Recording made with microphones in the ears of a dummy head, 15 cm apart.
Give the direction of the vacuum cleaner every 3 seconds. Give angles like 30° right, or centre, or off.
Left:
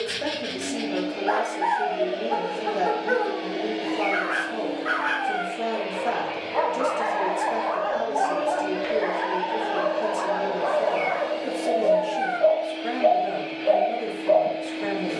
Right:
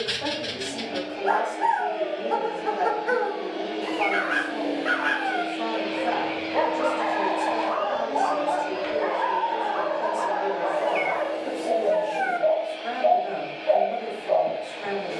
50° left, 10° right, 30° right, 40° left, 60° left.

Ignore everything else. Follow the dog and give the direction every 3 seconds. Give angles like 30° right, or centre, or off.
50° right, 40° right, centre, 40° left, 60° left.